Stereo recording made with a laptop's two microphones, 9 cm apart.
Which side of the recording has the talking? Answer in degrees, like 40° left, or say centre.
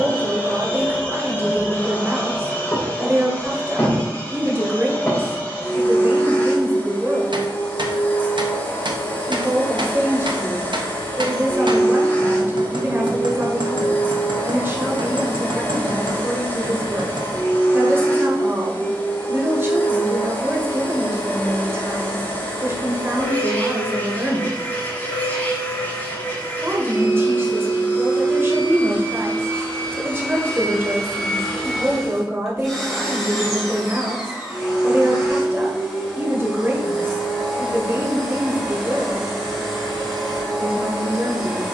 30° right.